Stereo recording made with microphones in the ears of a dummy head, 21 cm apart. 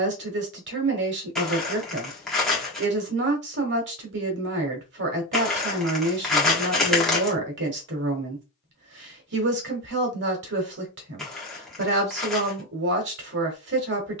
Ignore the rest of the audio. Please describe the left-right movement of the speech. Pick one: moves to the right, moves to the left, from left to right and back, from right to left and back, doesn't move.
doesn't move.